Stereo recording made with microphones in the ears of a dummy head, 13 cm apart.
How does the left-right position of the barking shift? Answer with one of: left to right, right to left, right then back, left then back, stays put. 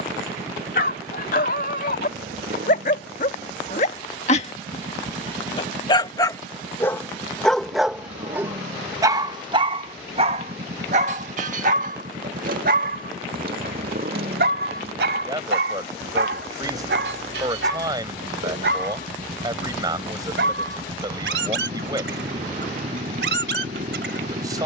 left to right.